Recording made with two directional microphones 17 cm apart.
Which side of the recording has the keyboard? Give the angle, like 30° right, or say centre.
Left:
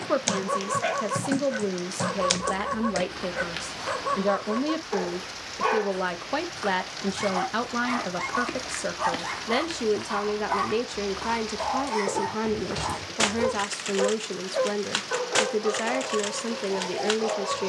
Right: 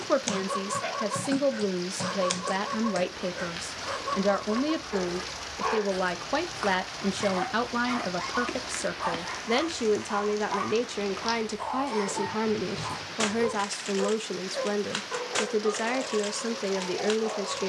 20° left.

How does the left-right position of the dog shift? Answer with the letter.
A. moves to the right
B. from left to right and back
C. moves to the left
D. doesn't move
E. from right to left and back
D.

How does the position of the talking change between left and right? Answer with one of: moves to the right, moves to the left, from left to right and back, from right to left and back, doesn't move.
doesn't move.